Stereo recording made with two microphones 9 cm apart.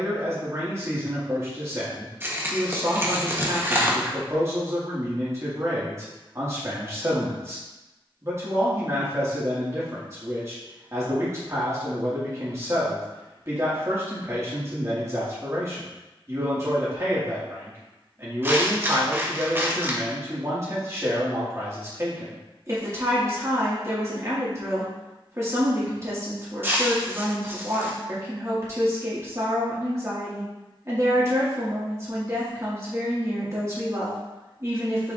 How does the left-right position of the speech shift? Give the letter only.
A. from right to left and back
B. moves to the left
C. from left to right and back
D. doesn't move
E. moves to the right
D.